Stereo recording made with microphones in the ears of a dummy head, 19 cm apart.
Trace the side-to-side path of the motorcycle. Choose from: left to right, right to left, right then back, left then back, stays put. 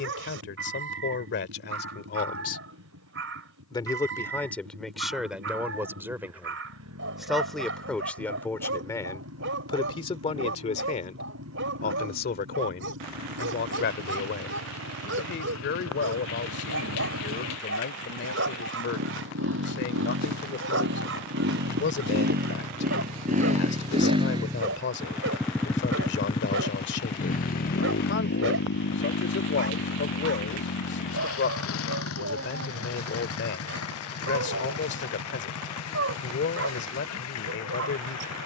right to left.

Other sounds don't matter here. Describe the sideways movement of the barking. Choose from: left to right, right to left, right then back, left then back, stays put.
stays put.